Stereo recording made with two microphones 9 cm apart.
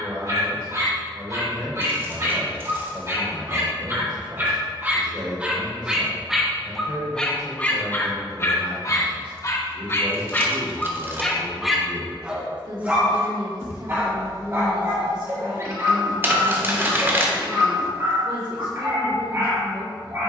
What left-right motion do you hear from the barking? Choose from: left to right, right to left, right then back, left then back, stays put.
left then back.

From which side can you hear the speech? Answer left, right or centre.
right.